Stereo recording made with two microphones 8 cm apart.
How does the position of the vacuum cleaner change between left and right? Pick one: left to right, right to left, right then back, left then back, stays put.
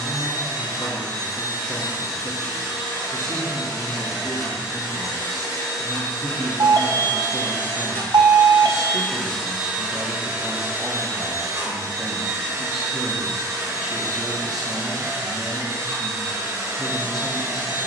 left to right.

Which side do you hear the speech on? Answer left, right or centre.
centre.